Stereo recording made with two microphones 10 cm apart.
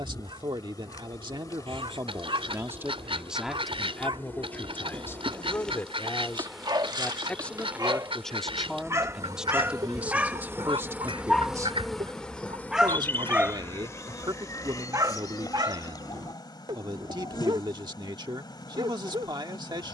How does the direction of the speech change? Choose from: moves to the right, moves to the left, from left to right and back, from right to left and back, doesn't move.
from right to left and back.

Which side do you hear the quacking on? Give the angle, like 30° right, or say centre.
70° right.